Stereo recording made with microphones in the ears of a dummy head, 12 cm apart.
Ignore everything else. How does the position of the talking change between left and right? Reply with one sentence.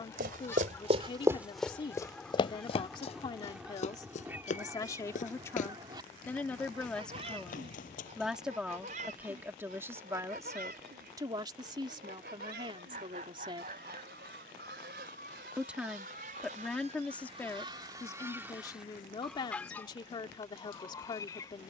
You can hear the talking move from left to right and back again.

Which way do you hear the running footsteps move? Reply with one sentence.
You can hear the running footsteps move to the left.